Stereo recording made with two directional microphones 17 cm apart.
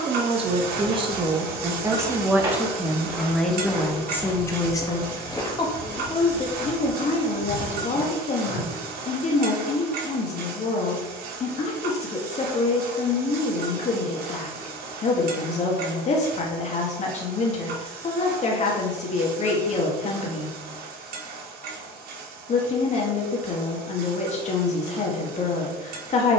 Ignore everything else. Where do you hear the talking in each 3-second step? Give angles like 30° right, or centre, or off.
20° right, 10° left, 40° left, 40° left, 40° left, 40° left, 40° left, 40° left, 40° left.